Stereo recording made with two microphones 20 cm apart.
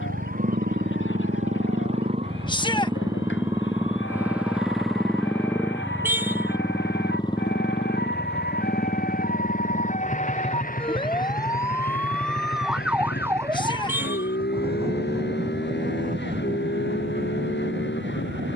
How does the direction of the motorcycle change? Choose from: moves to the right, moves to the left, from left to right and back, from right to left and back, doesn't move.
moves to the left.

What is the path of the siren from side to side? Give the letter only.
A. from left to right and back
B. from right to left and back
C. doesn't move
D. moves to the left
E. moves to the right
E.